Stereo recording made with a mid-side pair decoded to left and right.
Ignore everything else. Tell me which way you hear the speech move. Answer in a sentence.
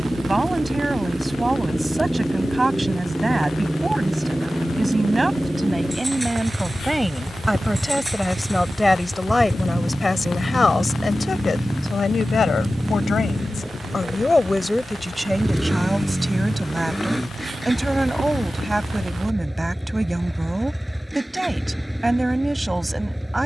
You can hear the speech go left and come back.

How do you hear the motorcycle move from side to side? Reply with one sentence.
In this clip you hear the motorcycle stay in one place.